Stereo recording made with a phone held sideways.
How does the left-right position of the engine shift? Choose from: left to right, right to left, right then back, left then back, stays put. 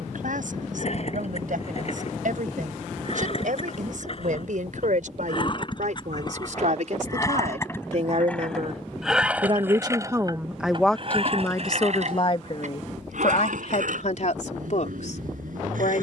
left to right.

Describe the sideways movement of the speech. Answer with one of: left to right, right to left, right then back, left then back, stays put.
right to left.